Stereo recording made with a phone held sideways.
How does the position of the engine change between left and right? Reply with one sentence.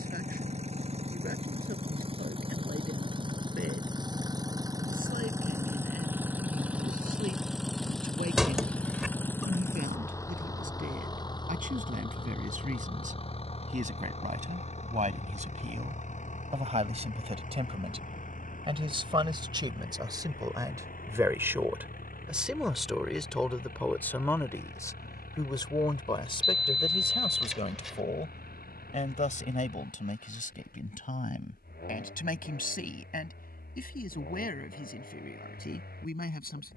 In this clip you hear the engine go from the right side to the left.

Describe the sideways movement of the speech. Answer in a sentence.
You can hear the speech move from right to left.